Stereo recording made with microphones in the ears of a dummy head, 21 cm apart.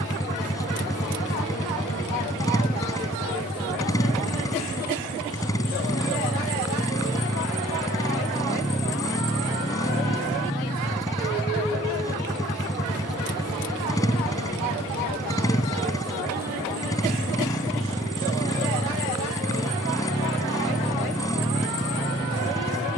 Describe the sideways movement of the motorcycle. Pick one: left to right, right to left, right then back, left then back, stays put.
stays put.